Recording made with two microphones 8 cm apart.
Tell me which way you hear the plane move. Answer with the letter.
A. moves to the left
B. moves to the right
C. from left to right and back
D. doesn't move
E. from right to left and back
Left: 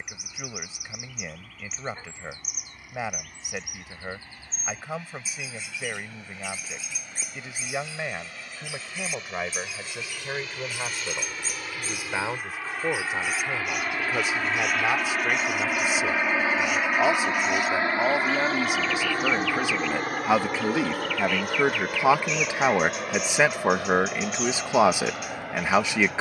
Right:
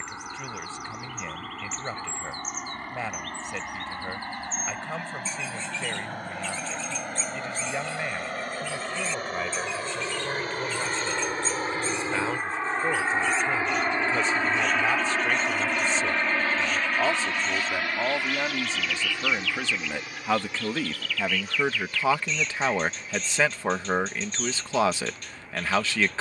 A.